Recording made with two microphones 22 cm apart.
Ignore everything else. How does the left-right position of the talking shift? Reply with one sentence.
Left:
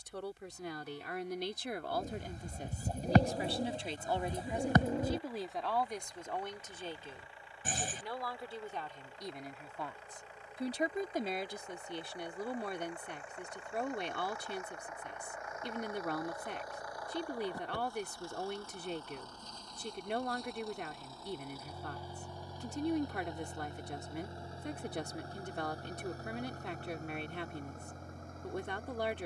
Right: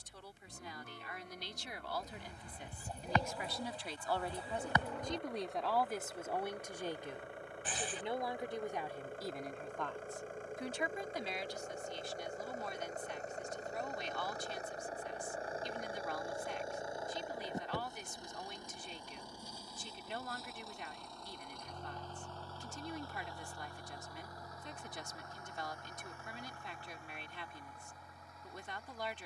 You can hear the talking go right and come back.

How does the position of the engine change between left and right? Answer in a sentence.
In this clip you hear the engine travel towards the left.